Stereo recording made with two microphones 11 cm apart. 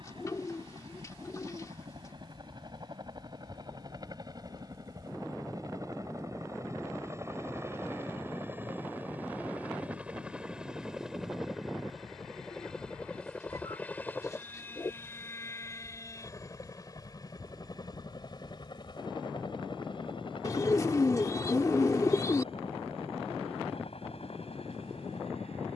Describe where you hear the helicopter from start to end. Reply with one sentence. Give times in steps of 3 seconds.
You can hear the helicopter on the right from 0 s, in the centre from 9 s and on the left from 15 s.